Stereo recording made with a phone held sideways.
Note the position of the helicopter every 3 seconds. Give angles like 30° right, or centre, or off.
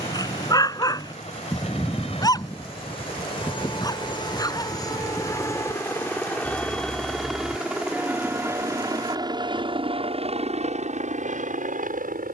40° left, 30° left, centre, 40° right.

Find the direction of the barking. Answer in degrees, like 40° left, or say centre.
20° left.